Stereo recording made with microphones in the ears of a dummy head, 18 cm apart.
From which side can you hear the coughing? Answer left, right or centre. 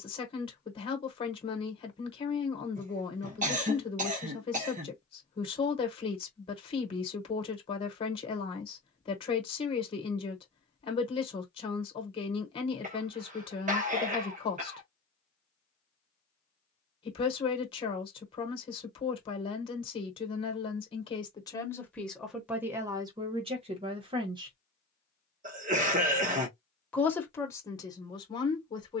right.